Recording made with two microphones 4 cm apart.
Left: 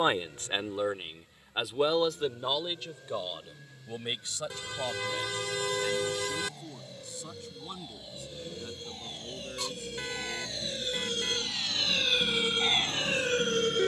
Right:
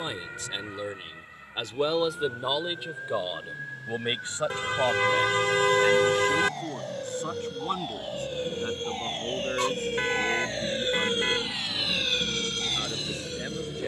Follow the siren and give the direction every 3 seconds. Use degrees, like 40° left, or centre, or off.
70° right, 70° right, 60° right, 40° right, 30° left.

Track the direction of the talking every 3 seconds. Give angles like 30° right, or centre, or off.
10° left, 30° right, 50° right, 50° right, 60° right.